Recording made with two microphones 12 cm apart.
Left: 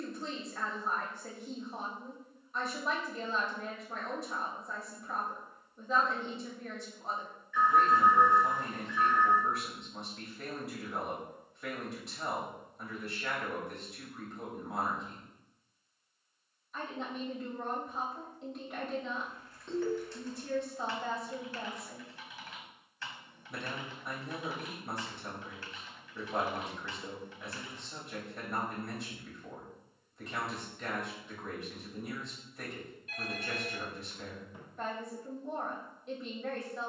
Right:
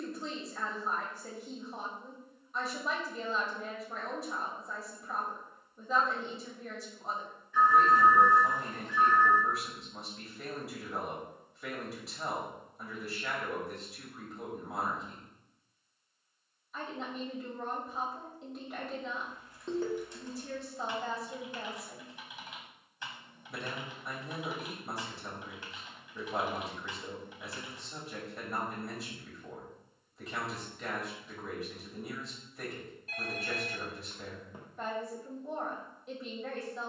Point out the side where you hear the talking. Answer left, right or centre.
centre.